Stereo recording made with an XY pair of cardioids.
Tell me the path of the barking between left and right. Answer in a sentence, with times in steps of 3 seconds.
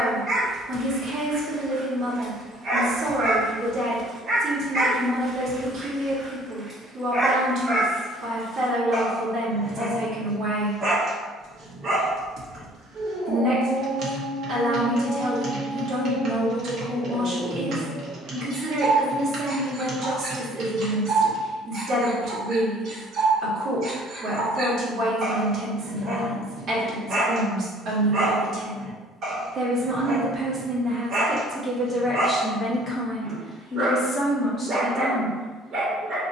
In this clip you hear the barking on the right from 0 s, in the centre from 6 s and on the right from 9 s.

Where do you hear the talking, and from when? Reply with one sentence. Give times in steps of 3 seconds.
In this clip you hear the talking on the right from 0 s, in the centre from 30 s and on the left from 33 s.